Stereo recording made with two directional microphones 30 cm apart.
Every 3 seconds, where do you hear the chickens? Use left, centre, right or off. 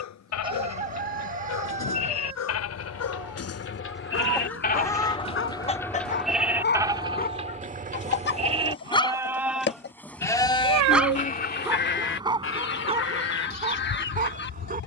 right, centre, left, left, left.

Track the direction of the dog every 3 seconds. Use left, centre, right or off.
left, left, left, centre, right.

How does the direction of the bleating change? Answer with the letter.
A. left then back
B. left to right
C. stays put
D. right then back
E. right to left
D.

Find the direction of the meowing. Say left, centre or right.
right.